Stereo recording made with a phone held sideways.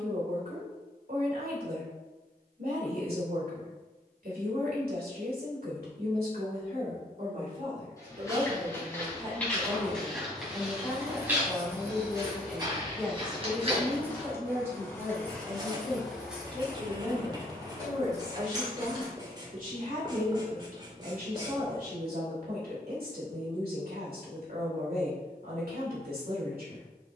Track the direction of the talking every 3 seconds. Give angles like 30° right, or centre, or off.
70° right, 70° right, 50° right, 10° right, 10° right, 30° right, 60° right, 70° right, 70° right.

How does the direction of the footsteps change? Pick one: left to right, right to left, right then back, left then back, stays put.
left to right.